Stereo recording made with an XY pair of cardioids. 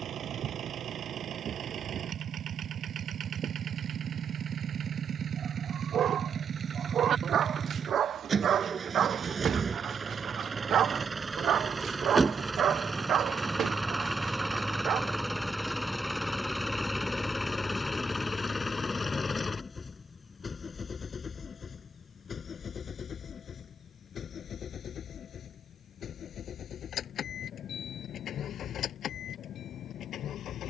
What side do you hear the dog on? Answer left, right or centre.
right.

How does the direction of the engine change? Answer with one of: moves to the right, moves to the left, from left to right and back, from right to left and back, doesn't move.
moves to the left.